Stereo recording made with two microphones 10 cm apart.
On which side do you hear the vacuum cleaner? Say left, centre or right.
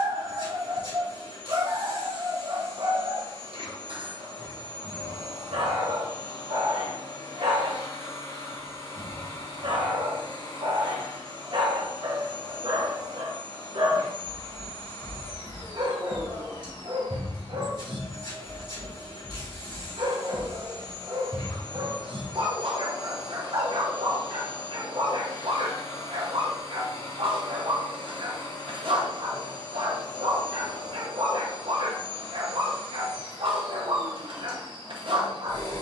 left.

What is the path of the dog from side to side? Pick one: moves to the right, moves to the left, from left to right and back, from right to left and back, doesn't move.
doesn't move.